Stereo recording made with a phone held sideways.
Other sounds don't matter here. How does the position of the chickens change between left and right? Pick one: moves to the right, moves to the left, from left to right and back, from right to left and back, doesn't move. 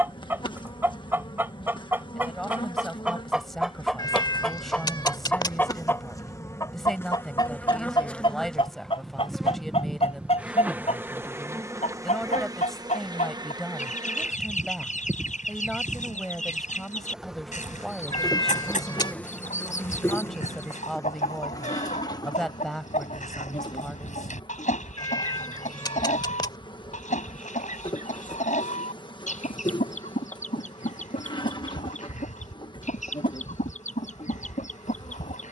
moves to the left.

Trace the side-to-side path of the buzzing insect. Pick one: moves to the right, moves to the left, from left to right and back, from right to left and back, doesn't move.
from left to right and back.